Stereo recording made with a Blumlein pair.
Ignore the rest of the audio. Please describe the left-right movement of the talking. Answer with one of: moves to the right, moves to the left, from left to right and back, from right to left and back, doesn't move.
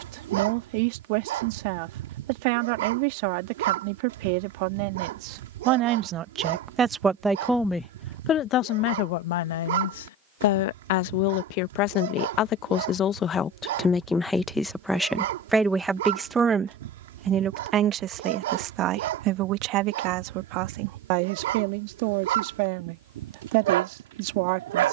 from right to left and back.